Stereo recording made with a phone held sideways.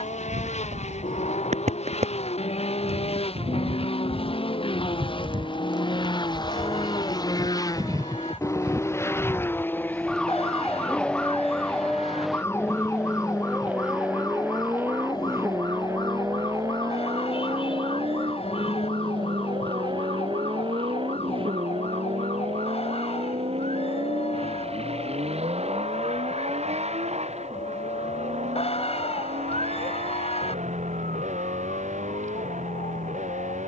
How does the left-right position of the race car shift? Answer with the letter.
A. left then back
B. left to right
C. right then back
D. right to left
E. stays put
B.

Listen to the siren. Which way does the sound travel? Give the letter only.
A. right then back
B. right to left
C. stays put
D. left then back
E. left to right
B.